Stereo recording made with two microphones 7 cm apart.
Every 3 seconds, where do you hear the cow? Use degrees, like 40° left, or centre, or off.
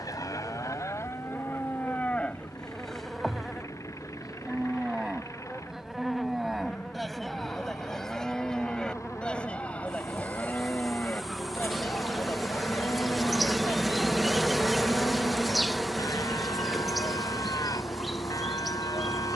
30° left, 10° right, centre, 20° left, 40° left, 60° left, 60° left.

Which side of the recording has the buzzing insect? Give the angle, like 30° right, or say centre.
centre.